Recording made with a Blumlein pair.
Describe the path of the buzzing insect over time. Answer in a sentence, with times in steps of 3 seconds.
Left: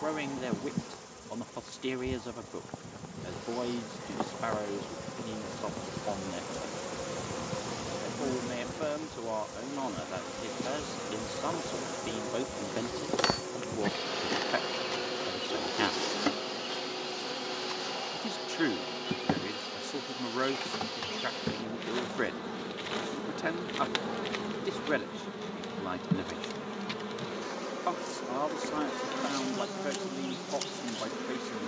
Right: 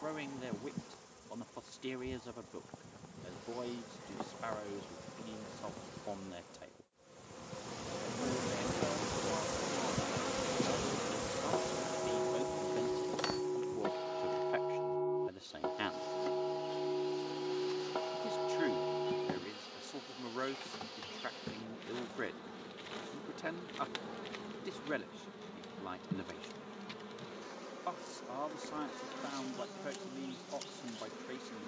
In this clip you hear the buzzing insect on the left from 0 s, in the centre from 9 s and on the left from 12 s.